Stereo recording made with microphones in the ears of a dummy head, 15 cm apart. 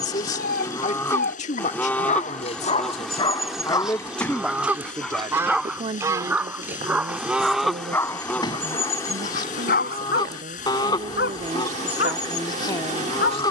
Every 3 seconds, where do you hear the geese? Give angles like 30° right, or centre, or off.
10° left, 10° right, centre, 30° left, 30° left.